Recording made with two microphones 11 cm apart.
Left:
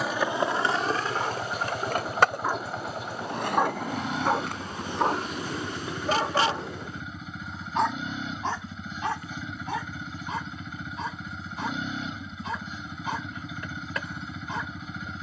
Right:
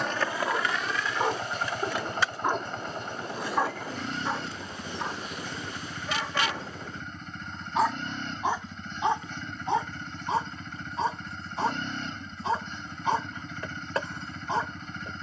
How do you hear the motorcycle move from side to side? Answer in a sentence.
You can hear the motorcycle stay in one place.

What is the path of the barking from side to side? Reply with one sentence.
You can hear the barking go left and come back.